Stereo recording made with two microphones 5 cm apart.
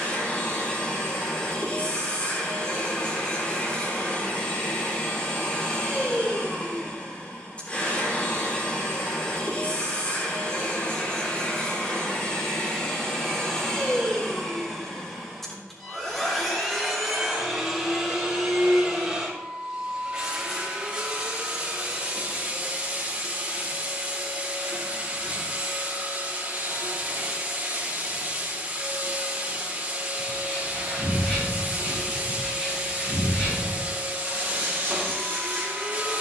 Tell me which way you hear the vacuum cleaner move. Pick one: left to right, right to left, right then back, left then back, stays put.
left to right.